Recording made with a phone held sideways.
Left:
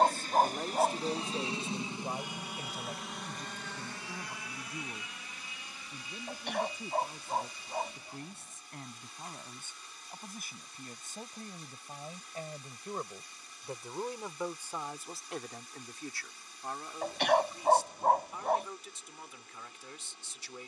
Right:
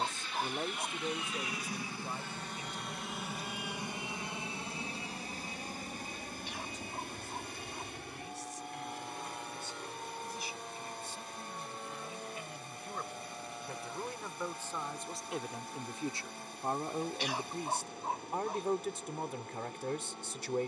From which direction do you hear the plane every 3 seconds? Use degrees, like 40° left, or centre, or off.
30° left, 20° right, 50° right, 60° right, 70° right, 70° right, 70° right.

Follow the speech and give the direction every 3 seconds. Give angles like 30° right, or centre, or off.
20° left, 50° left, 60° left, 50° left, 30° left, 30° right, 60° right.